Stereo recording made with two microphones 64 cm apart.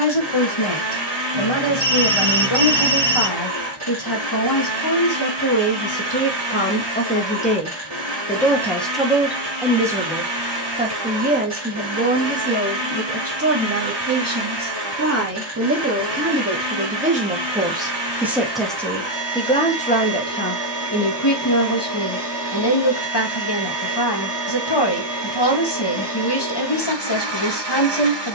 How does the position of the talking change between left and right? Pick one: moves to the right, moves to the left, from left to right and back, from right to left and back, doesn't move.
from left to right and back.